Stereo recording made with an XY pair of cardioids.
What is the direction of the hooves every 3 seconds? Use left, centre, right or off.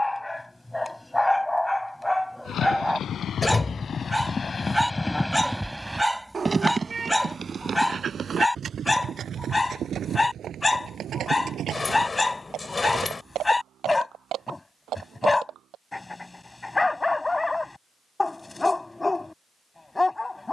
left, left, right, right, right, right, off.